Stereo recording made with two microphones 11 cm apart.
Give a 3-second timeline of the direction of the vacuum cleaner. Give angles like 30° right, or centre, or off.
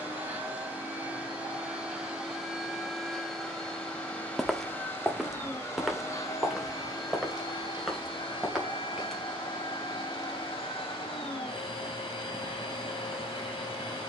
10° right, 10° left, 40° left, 50° left, 50° left.